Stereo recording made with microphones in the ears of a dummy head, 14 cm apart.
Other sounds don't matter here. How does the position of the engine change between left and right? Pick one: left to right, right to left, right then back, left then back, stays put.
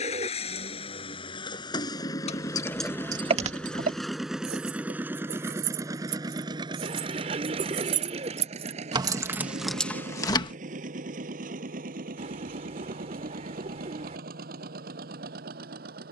left to right.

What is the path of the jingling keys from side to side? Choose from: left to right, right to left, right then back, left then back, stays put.
right then back.